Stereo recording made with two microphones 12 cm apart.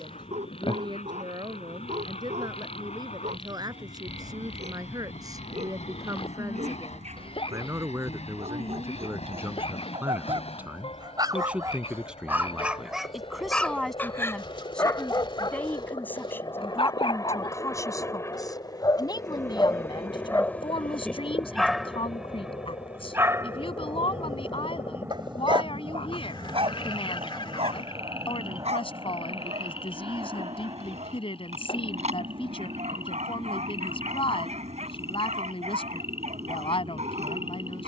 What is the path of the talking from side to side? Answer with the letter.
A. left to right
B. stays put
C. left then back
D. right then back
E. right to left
E.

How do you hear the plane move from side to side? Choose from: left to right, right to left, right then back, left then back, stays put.
left to right.